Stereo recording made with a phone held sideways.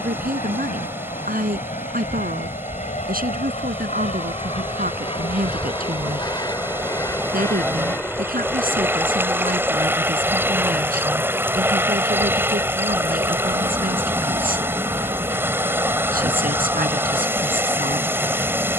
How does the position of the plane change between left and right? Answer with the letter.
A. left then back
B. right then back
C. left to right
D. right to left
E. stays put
C.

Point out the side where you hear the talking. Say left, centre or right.
right.